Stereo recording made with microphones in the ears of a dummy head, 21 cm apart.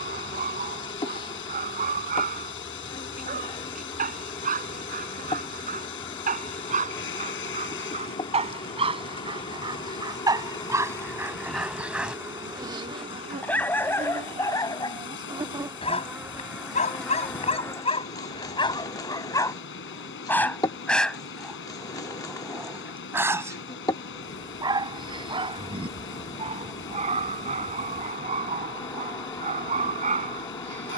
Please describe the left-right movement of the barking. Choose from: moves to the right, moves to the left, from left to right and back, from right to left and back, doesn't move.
from right to left and back.